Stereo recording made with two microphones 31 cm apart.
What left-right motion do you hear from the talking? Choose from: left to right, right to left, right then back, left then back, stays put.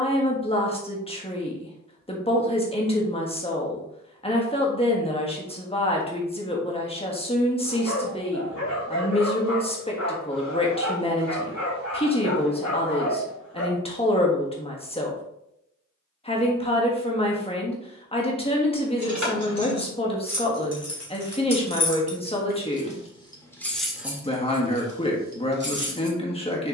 stays put.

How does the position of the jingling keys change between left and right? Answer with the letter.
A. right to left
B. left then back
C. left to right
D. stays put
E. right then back
C.